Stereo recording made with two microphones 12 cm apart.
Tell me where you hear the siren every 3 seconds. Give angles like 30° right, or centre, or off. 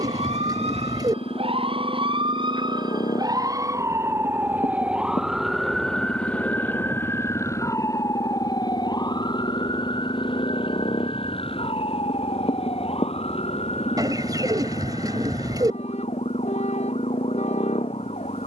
50° right, 10° right, 20° left, 40° left, 50° left, 60° left.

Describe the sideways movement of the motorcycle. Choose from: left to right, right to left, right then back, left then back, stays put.
stays put.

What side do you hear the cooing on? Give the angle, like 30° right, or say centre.
30° right.